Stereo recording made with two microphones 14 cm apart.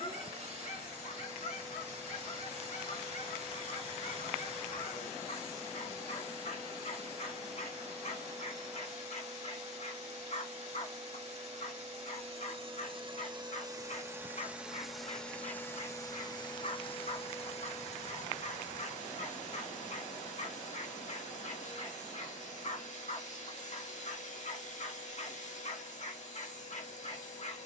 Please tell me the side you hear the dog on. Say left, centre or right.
left.